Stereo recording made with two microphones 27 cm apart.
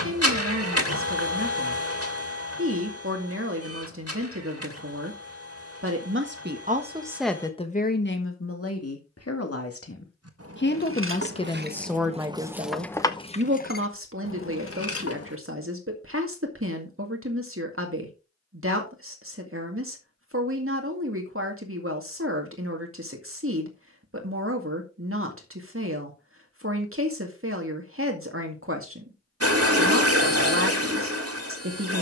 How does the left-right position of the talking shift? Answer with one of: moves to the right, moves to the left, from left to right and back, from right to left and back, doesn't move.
from right to left and back.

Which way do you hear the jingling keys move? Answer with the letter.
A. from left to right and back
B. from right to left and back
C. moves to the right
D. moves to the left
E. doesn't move
D.